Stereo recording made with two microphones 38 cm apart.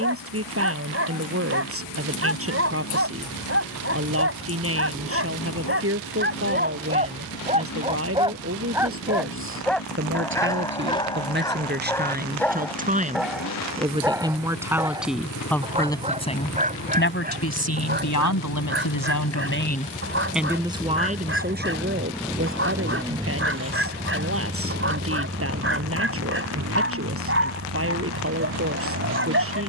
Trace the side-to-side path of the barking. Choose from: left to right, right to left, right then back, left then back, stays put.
left then back.